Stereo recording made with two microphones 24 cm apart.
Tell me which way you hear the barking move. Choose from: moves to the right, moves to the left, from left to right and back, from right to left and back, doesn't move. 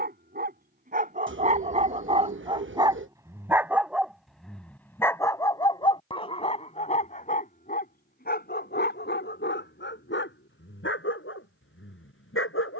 moves to the left.